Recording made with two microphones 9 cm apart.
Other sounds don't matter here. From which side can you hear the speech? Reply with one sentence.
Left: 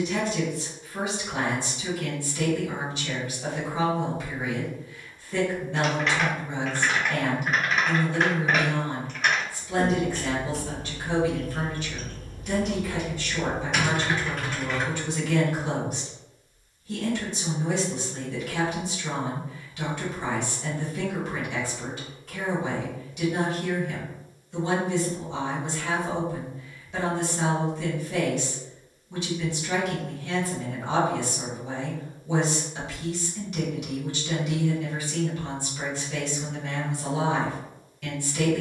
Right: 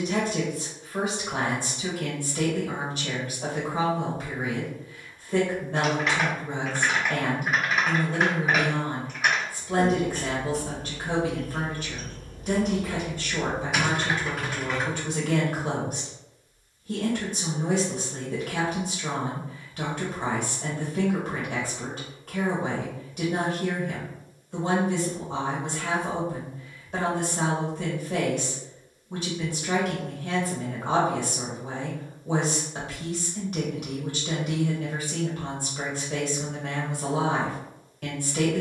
In this clip you hear the speech on the right.